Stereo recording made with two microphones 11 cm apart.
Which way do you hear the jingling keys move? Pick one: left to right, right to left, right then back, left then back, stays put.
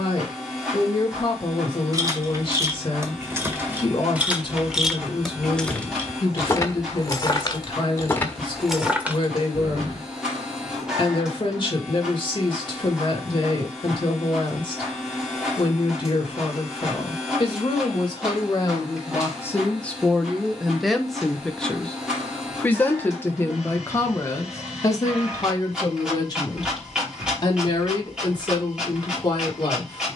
left then back.